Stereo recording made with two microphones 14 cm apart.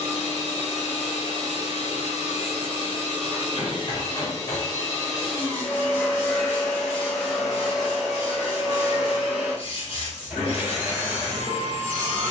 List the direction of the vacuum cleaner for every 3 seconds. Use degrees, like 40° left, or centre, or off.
60° left, 30° left, centre, 10° right.